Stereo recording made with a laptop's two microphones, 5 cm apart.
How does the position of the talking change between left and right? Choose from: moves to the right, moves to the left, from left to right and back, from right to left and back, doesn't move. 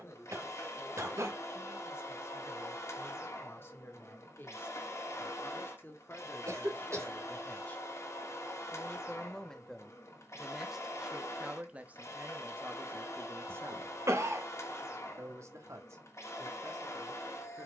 moves to the right.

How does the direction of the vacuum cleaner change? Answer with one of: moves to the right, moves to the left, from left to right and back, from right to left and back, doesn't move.
doesn't move.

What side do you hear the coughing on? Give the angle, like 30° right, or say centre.
70° right.